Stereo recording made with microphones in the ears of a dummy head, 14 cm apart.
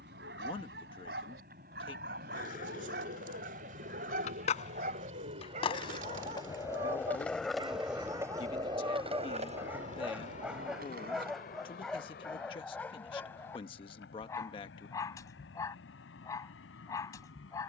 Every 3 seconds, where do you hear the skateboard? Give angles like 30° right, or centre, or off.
60° left, 50° left, centre, 60° right, off, off.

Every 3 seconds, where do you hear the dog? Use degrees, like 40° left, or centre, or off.
70° right, 50° right, 30° right, centre, 10° left, 20° left.